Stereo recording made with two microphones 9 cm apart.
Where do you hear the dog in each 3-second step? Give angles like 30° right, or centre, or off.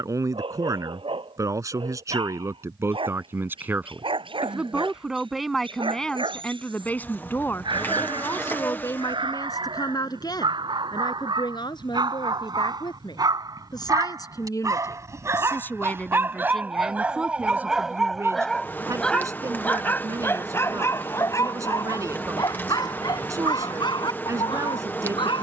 70° right, 70° right, 60° right, 60° right, 40° right, 20° right, 10° left, 40° left, 60° left.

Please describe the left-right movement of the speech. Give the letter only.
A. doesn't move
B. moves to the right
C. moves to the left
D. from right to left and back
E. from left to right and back
D.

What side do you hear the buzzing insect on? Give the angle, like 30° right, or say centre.
20° left.